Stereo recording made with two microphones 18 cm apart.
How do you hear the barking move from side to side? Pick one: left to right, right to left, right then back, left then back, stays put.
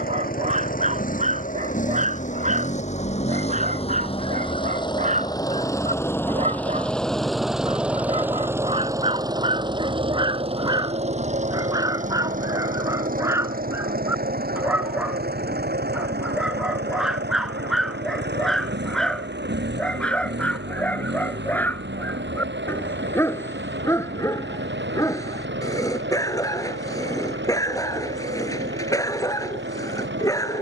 right to left.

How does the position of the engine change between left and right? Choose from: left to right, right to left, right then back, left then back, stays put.
left to right.